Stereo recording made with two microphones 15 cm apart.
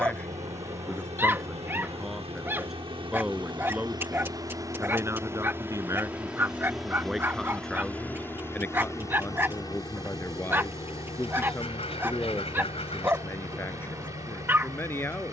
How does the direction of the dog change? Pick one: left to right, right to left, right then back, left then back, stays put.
stays put.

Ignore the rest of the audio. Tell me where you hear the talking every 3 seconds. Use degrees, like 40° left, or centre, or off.
centre, 10° right, centre, 20° left, 20° left.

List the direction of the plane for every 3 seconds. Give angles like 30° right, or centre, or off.
50° right, 30° right, 10° left, 30° left, 40° left.